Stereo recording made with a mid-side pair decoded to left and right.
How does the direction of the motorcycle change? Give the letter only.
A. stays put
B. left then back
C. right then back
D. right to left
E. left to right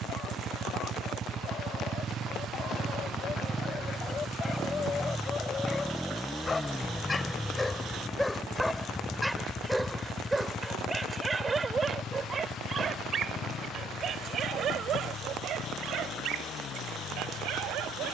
D.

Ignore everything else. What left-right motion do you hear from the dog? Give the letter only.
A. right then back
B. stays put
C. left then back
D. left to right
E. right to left
D.